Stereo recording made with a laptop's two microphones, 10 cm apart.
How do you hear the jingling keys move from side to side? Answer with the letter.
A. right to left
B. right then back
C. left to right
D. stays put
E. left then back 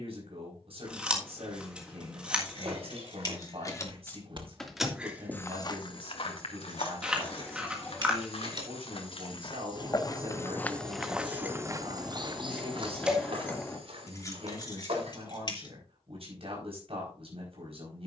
B.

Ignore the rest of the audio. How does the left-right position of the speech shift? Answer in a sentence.
In this clip you hear the speech stay in one place.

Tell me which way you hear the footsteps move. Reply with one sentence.
In this clip you hear the footsteps move from right to left and back again.